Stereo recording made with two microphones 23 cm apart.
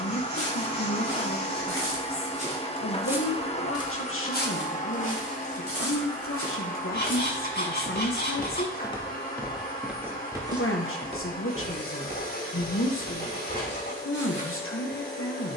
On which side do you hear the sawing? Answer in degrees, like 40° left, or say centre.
50° left.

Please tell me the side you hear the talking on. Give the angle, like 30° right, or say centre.
60° left.